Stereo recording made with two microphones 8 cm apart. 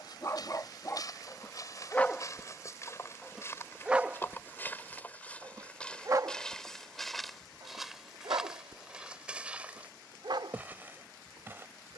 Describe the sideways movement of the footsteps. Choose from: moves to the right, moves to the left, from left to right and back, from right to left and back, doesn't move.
moves to the right.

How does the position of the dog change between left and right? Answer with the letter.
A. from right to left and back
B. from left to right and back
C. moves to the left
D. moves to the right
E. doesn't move
D.